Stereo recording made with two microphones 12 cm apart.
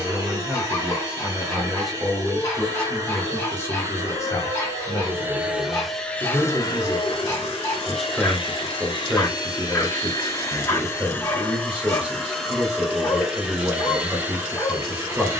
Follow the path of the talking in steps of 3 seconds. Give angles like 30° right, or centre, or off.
10° right, 30° left, 10° left, 10° right, 10° right.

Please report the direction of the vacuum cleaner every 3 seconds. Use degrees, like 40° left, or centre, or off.
30° right, 20° right, 40° left, 30° left, 10° right.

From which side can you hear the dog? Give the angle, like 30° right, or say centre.
30° left.